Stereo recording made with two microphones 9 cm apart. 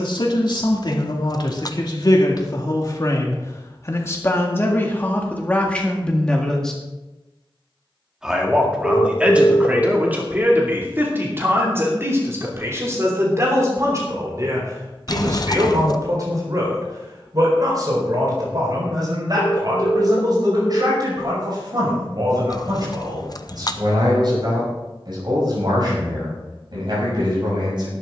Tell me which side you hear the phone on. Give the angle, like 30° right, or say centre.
40° left.